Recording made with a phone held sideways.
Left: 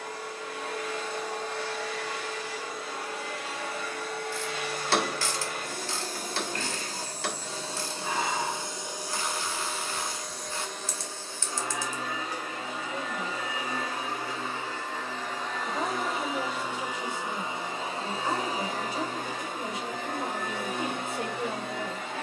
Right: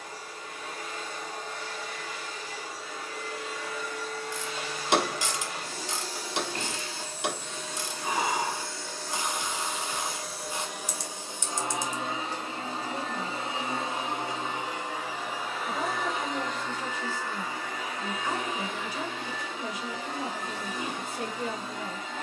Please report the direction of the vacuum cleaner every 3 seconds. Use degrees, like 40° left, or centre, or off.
70° left, 60° left, 30° left, 10° right, 20° right, 10° left, 50° left, 60° left.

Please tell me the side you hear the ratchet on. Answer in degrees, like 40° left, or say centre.
20° right.